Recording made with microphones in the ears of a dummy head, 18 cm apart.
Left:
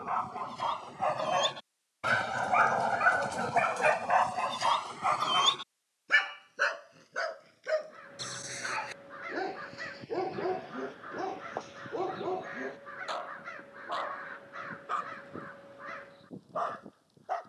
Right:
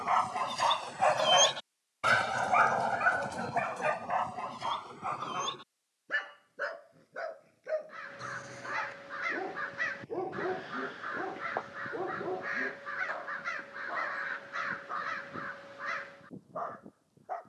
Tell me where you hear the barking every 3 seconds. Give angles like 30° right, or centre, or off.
30° right, 30° left, 60° left, 70° left, 70° left, 80° left.